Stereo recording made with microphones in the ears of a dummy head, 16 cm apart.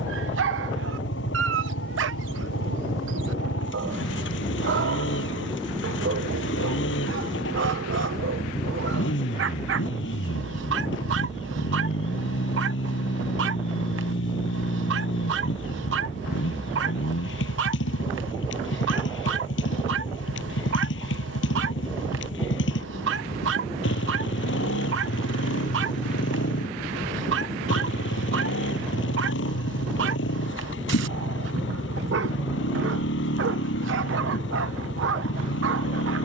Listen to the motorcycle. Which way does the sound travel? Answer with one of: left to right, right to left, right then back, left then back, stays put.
stays put.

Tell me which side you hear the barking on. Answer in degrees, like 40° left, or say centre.
70° right.